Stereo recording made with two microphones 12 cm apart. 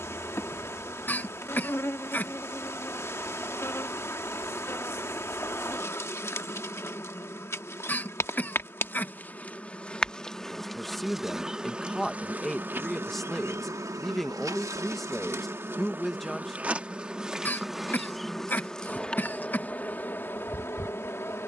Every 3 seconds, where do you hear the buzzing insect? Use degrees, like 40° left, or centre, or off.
20° left, 20° left, 20° left, centre, 20° right, 10° right, 10° left.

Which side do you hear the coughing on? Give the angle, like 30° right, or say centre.
20° left.